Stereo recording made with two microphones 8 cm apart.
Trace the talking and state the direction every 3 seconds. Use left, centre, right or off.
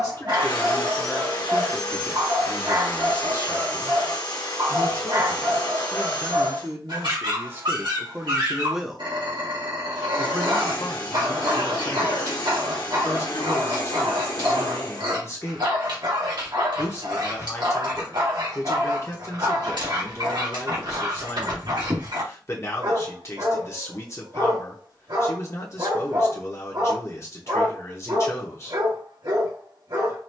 centre, right, right, left, left, left, left, left, left, left.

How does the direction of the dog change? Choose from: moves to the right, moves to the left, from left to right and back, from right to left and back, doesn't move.
doesn't move.